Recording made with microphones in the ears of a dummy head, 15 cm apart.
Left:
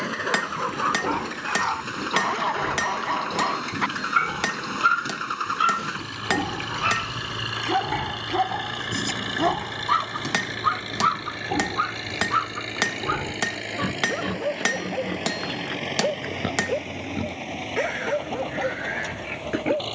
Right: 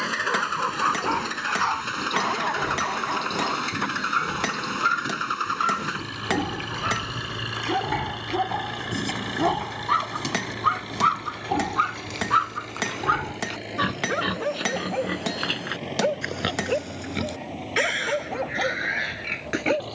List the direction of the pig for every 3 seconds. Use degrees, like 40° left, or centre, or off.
40° left, 30° left, 10° left, 20° right, 50° right, 60° right, 70° right.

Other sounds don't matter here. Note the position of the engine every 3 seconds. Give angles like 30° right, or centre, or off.
30° right, 10° right, 10° left, 30° left, 40° left, 50° left, 50° left.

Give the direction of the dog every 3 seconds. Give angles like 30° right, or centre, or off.
10° right, 50° left, 50° left, centre, 40° right, 50° right, 50° right.